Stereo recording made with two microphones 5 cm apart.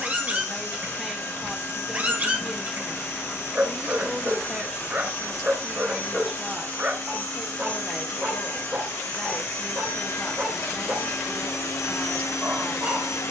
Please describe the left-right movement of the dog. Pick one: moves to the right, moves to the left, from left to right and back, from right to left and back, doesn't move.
doesn't move.